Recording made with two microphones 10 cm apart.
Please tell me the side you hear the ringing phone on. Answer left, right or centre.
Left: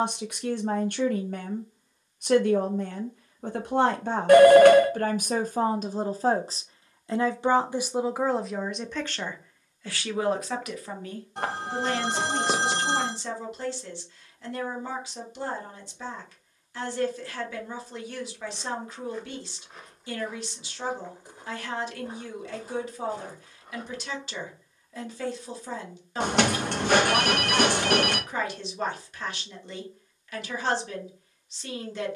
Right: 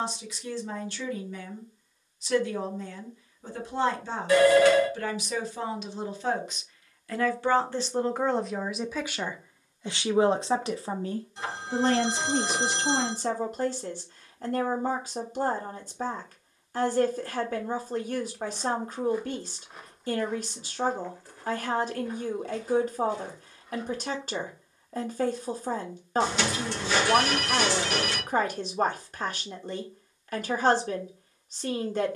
left.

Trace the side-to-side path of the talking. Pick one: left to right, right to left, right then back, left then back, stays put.
left to right.